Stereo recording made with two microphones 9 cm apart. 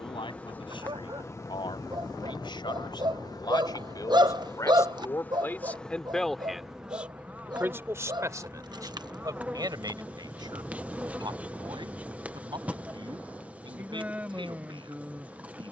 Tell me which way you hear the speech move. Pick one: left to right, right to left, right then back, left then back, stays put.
left to right.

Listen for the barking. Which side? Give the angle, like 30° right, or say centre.
50° right.